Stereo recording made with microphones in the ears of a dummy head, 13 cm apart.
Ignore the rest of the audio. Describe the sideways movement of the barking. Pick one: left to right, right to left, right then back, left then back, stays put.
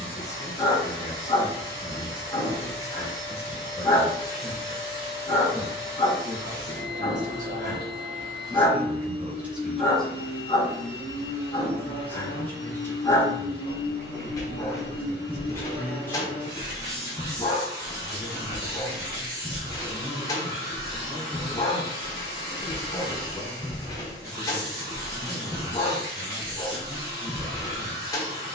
stays put.